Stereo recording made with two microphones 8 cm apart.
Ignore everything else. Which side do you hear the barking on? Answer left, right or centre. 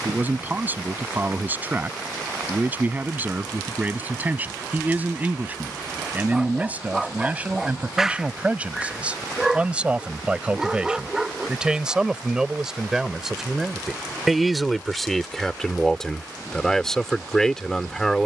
centre.